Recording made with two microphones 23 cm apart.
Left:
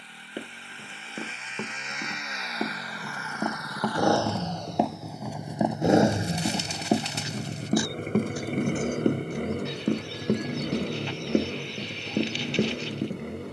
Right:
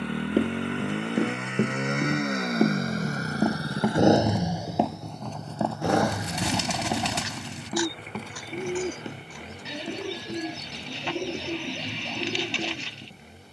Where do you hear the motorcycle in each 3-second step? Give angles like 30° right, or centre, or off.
60° right, 10° right, 40° left, 60° left, 60° left.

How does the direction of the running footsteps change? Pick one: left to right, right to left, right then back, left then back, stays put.
right to left.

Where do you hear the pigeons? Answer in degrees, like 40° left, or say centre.
80° right.